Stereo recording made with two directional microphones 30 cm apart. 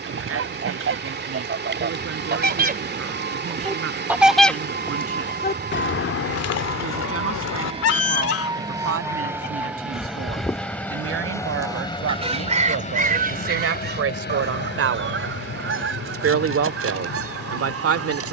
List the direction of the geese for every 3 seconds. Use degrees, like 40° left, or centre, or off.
40° right, 20° left, 60° left, 10° left, 30° right, 50° right.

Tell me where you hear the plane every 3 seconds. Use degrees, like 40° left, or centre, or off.
40° right, 40° right, 20° right, centre, 30° left, 50° left.